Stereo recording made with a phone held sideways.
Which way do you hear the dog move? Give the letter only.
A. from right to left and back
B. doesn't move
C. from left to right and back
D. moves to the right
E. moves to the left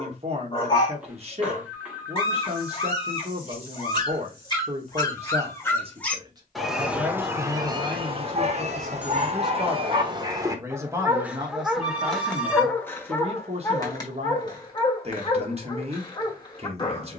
C.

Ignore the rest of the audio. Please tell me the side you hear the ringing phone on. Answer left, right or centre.
centre.